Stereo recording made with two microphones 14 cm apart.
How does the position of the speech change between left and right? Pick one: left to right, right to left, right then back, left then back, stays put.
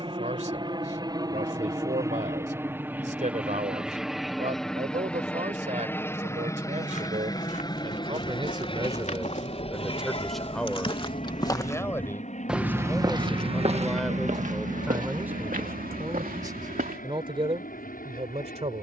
left then back.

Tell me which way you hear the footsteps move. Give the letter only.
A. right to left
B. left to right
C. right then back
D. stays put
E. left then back
B.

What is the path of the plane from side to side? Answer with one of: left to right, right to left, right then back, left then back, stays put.
right to left.